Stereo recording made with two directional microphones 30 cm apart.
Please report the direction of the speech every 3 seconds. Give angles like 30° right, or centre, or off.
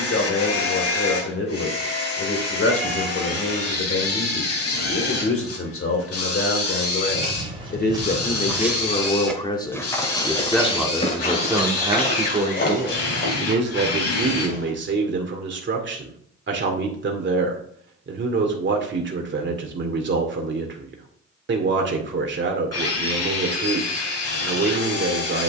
50° left, 50° left, 30° left, centre, 30° right, 40° right, 40° right, 40° right, 40° right.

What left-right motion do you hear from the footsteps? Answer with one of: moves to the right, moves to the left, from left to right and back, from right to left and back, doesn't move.
moves to the left.